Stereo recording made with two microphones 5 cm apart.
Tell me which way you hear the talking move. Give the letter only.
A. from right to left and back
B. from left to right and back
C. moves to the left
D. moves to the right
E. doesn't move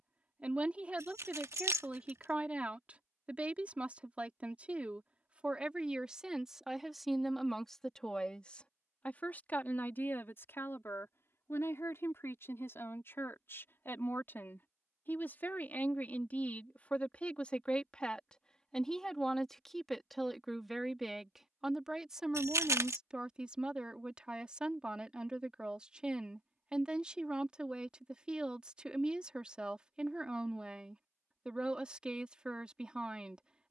A.